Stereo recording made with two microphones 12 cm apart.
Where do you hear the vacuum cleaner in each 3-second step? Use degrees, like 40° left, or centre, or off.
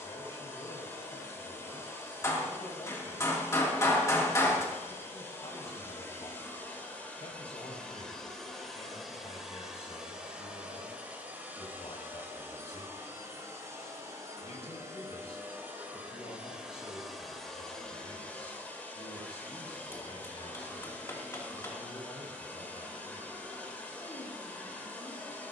20° left, 20° left, 10° left, 10° right, 20° right, 10° right, 10° left, 10° left, 10° left.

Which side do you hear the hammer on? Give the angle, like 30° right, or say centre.
20° left.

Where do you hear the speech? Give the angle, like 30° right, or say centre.
60° left.